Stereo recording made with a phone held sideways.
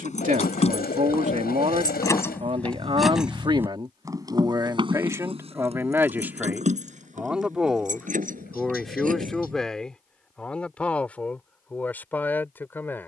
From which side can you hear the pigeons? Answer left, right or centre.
left.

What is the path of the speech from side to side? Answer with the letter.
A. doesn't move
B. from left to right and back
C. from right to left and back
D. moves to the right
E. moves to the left
E.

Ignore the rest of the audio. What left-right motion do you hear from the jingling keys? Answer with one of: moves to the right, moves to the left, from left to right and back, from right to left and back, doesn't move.
moves to the right.